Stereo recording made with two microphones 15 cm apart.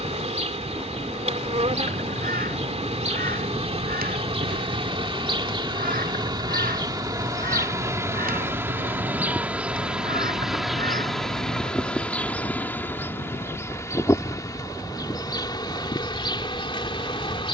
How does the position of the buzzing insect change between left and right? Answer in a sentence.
In this clip you hear the buzzing insect move to the left.